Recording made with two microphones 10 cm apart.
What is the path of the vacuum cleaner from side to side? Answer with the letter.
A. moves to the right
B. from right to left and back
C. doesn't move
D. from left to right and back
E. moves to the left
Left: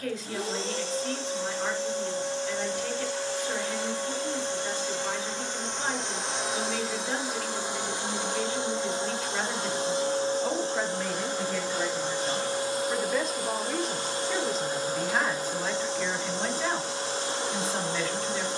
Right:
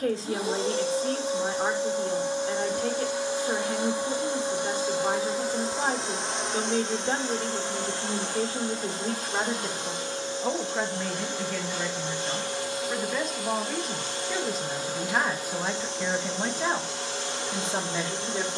E.